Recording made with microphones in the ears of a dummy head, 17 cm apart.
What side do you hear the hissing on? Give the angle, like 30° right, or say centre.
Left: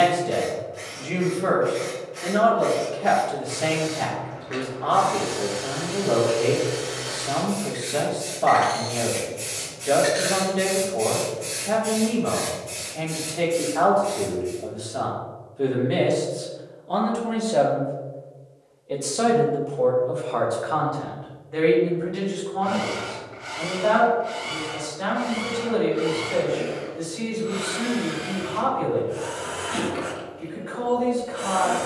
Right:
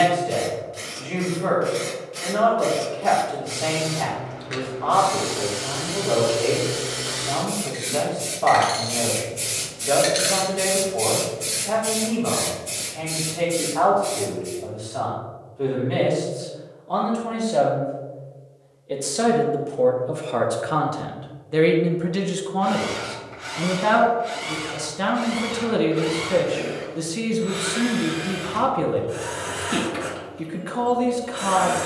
50° right.